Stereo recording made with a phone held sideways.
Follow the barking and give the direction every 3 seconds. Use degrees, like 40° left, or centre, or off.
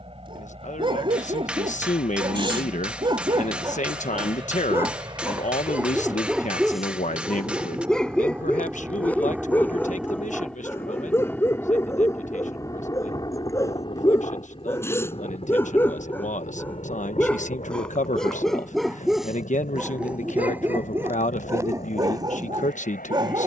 40° right, 20° right, centre, 20° left, 20° left, 10° left, 10° right, 30° right.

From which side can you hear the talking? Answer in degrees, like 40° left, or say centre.
60° left.